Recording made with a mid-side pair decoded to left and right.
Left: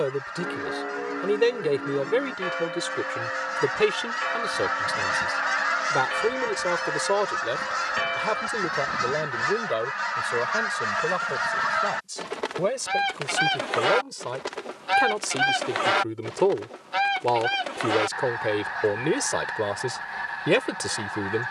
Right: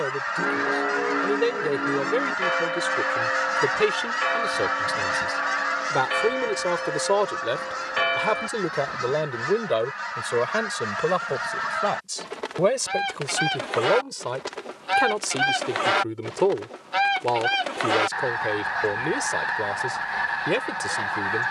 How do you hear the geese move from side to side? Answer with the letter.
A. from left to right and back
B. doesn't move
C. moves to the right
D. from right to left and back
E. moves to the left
D.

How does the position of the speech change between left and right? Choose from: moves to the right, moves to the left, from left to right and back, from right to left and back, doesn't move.
from left to right and back.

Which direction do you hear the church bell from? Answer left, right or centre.
right.